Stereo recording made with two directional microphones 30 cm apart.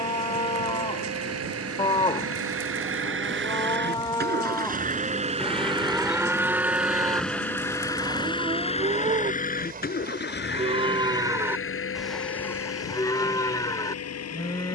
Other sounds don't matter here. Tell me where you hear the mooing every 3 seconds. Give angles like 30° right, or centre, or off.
20° left, 10° left, 10° right, 20° right, 10° left.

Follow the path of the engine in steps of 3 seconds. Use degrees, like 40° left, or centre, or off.
50° right, 30° right, 10° left, 40° left, 50° left.